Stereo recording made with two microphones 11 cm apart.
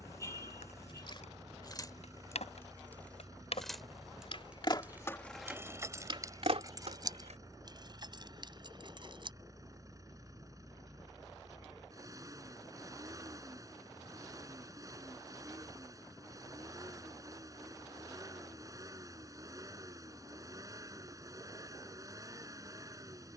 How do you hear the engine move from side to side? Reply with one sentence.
You can hear the engine stay in one place.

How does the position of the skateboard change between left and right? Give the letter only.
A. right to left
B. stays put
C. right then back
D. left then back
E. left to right
E.